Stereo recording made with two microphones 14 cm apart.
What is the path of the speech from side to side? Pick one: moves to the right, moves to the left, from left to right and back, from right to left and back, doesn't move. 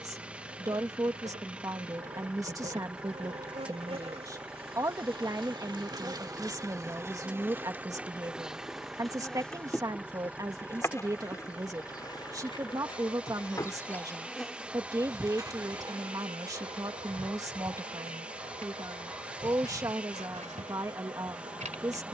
doesn't move.